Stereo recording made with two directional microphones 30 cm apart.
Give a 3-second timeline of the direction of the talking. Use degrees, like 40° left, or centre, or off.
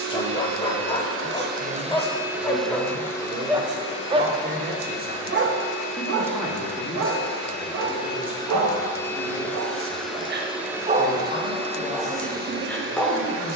30° right, 30° right, 10° left, 30° left, 40° left.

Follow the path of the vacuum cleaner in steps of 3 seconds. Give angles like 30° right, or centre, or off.
30° right, 20° left, 20° left, centre, 40° right.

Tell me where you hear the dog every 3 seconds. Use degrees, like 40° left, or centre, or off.
10° left, 20° right, 60° right, 30° right, centre.